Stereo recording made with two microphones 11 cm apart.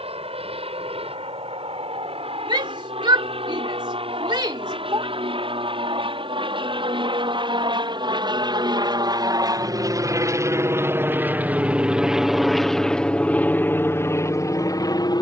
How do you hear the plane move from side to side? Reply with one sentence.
You can hear the plane go from the right side to the left.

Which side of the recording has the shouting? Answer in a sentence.
In this clip you hear the shouting on the right.